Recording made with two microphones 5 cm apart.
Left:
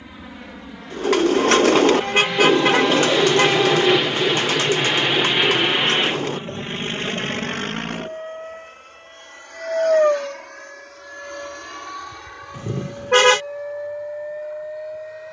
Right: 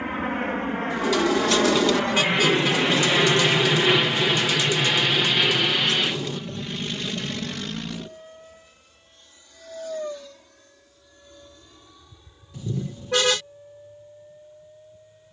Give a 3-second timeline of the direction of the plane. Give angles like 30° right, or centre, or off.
40° right, centre, 40° left, 60° left, 70° left.